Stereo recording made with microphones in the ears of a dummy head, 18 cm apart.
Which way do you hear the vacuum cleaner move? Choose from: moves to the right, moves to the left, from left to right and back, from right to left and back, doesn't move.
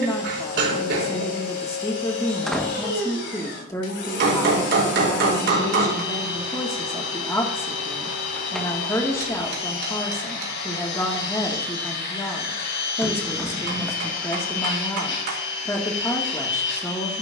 doesn't move.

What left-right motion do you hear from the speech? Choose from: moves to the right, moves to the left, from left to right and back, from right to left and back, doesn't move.
doesn't move.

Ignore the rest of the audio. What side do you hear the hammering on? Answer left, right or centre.
right.